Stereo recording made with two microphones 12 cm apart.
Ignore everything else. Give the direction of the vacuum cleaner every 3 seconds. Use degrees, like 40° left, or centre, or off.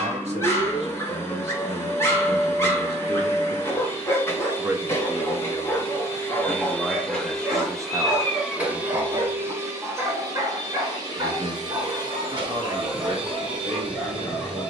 20° left, 20° left, centre, 30° right, 40° right.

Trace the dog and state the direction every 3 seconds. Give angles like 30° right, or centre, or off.
20° left, 20° left, centre, 20° right, 10° right.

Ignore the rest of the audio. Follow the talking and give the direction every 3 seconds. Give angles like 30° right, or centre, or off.
60° right, 20° right, 20° right, 50° right, 60° right.